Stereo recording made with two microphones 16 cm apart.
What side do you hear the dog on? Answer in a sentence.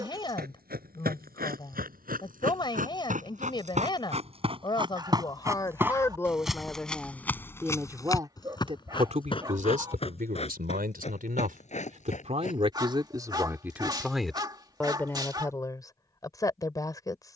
You can hear the dog on the right.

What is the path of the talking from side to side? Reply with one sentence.
You can hear the talking go right and come back.